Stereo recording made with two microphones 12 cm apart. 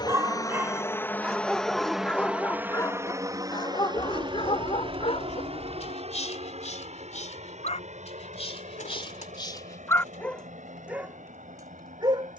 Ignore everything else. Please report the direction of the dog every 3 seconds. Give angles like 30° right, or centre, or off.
centre, 50° left, 60° left, 10° left.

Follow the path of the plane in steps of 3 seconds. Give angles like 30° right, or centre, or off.
10° left, 40° right, 60° right, 60° right.